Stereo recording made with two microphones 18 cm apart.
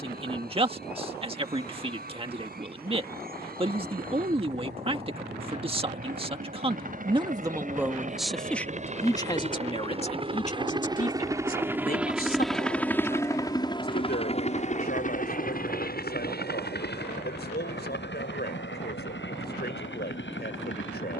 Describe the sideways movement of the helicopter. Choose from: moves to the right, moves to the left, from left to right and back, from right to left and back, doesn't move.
moves to the left.